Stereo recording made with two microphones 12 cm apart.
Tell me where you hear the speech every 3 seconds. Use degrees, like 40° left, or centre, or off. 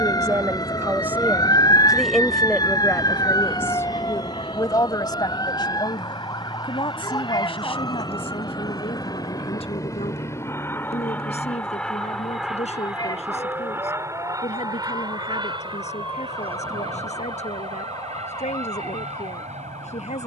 10° right, 30° left, 50° left, 60° left, 70° left, 70° left, 70° left.